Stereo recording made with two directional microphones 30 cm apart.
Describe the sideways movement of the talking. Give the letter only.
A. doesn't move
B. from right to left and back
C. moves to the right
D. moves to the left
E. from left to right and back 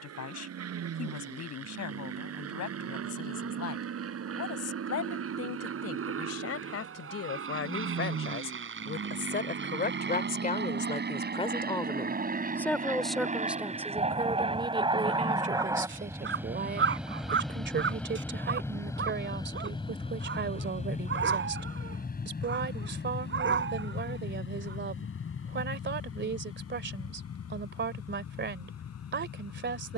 C.